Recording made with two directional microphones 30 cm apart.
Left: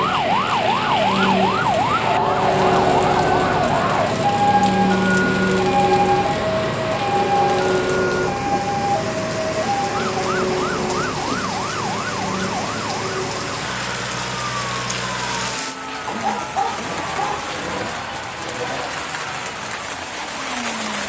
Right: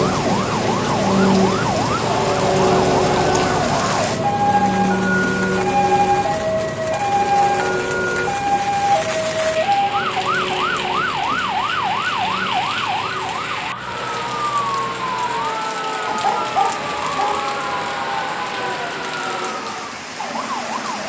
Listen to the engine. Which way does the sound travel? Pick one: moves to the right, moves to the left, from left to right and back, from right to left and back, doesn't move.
moves to the left.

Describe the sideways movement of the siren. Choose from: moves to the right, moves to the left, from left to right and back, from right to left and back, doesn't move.
moves to the right.